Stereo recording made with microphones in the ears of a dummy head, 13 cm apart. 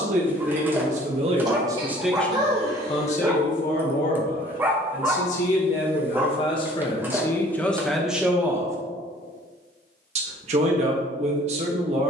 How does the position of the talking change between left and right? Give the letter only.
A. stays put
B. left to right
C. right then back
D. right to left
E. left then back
E.